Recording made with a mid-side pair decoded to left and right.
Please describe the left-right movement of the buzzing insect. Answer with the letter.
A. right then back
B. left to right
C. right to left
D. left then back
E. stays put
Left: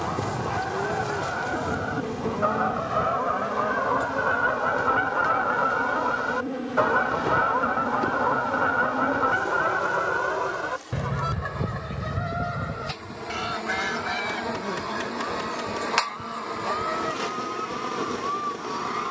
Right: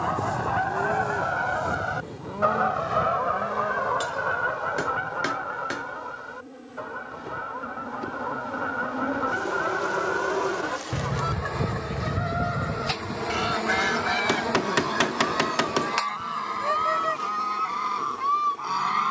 A.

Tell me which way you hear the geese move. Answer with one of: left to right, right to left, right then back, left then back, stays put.
left then back.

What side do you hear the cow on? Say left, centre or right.
centre.